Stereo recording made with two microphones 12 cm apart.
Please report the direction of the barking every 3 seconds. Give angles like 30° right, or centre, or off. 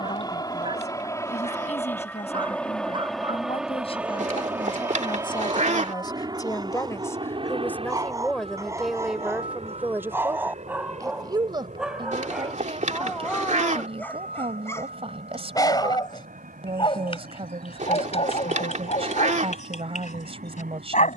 40° right, 40° right, 30° right, 10° right, 10° left, 40° left, 60° left.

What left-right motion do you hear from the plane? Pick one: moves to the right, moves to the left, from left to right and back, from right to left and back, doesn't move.
moves to the right.